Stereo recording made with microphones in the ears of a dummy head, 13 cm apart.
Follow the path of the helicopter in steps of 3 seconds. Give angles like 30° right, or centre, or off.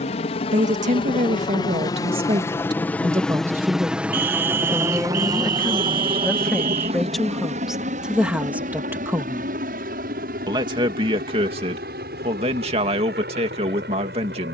30° left, 10° right, 50° right, 60° right, 70° right.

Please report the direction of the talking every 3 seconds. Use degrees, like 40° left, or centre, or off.
50° right, centre, centre, 30° right, 40° right.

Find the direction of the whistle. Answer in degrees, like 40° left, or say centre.
60° right.